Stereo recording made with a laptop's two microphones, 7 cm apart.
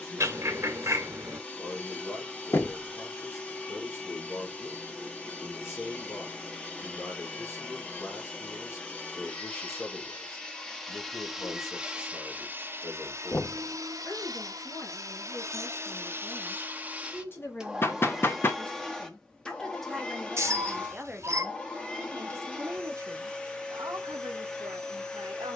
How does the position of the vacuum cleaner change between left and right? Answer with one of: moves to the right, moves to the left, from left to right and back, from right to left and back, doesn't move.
from left to right and back.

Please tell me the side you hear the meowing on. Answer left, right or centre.
right.